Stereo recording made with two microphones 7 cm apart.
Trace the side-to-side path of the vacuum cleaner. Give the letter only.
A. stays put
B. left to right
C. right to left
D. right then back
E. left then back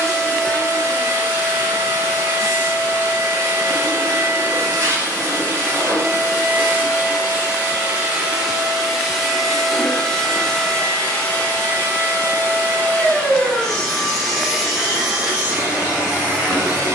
E.